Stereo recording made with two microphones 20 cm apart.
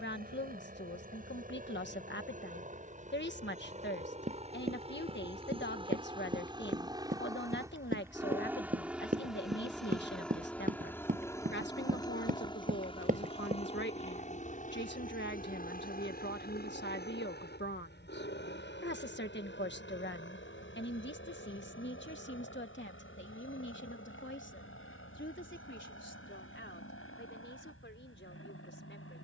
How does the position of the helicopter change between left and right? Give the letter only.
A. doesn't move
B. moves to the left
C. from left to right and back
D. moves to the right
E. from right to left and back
B.